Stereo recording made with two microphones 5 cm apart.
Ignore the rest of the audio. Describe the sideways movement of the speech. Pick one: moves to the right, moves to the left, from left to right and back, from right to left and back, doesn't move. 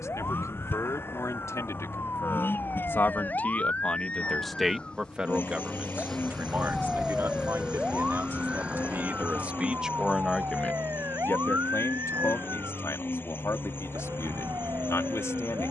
from left to right and back.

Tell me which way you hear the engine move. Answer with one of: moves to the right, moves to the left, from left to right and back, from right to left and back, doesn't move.
doesn't move.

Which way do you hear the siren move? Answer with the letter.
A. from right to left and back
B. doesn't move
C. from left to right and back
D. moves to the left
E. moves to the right
E.